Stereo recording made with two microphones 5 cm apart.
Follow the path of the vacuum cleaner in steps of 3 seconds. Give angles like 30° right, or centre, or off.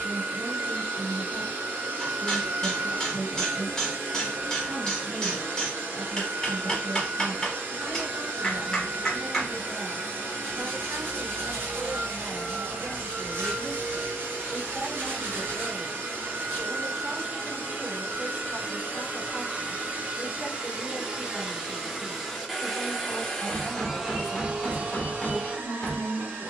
60° right, 60° right, 60° right, 60° right, 60° right, 50° right, 40° right, centre, 40° right.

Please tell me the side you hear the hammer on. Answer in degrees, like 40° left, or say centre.
20° left.